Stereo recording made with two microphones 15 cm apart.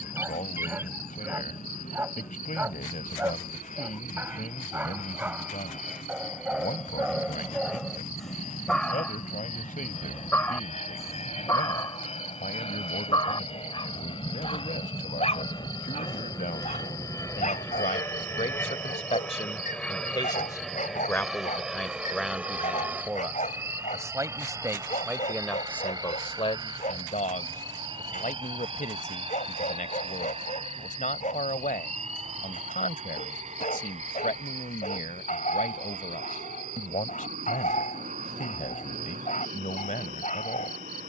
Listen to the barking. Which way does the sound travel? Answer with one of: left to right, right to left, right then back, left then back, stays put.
right to left.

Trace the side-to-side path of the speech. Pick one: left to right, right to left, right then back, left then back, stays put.
right then back.